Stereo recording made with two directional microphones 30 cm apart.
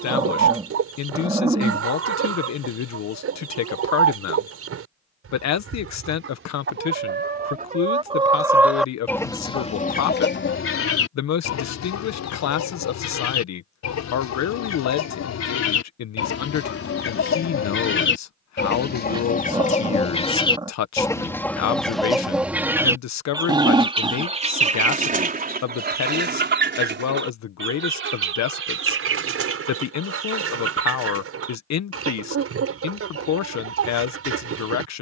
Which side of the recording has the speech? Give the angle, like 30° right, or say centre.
60° left.